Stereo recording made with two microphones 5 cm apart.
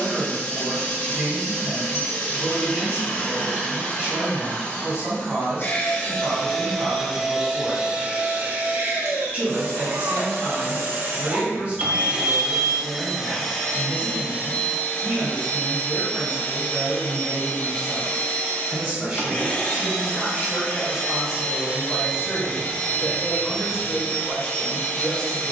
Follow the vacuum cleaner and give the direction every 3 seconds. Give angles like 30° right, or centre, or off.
30° left, 30° left, 10° right, 40° right, 10° left, 30° left, 30° left, 30° left, 30° left.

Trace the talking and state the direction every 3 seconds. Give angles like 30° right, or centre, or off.
30° right, 30° right, 30° right, 30° right, 30° right, 20° right, 20° right, centre, 10° left.